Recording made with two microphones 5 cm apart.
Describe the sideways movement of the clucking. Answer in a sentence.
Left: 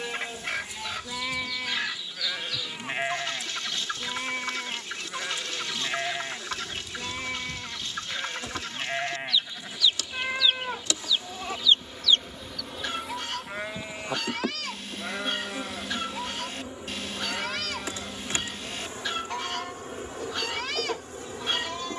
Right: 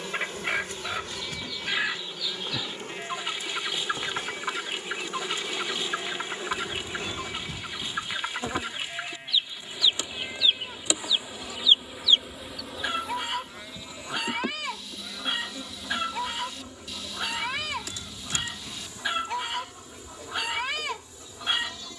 You can hear the clucking stay in one place.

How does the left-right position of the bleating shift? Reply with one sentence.
You can hear the bleating stay in one place.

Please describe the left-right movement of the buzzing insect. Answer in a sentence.
In this clip you hear the buzzing insect move to the left.